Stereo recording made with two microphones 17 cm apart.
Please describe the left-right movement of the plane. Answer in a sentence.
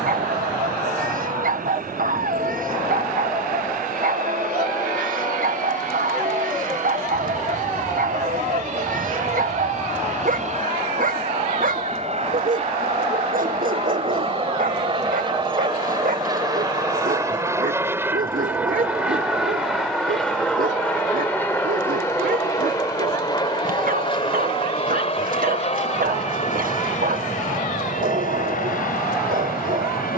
You can hear the plane move from right to left.